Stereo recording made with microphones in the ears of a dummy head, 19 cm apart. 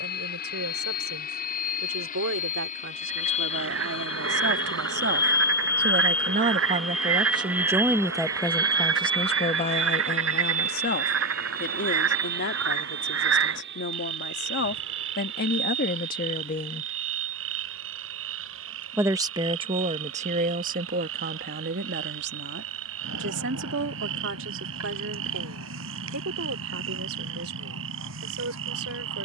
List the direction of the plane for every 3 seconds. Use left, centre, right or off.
left, left, centre, right, right, right, right, right, right, right.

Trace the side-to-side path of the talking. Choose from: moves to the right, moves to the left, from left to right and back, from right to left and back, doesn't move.
from right to left and back.